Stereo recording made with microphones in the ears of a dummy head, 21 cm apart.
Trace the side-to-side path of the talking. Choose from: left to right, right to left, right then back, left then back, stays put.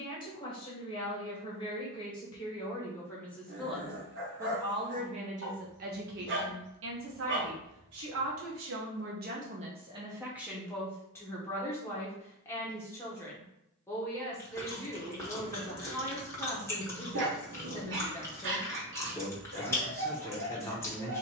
right then back.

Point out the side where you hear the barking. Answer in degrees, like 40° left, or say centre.
50° right.